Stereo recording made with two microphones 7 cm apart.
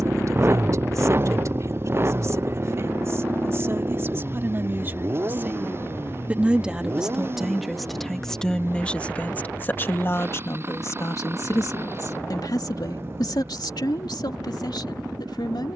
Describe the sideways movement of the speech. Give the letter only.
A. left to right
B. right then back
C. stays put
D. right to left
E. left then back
D.